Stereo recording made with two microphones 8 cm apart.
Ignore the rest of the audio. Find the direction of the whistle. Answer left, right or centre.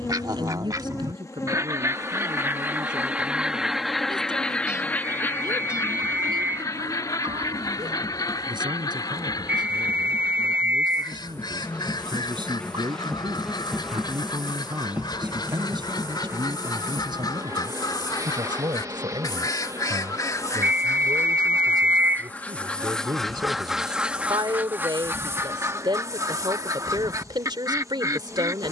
right.